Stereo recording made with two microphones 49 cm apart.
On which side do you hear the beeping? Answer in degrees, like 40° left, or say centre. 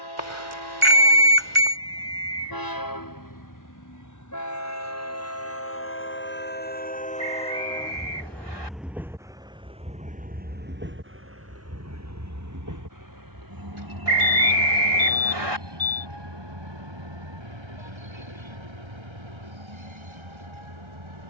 70° right.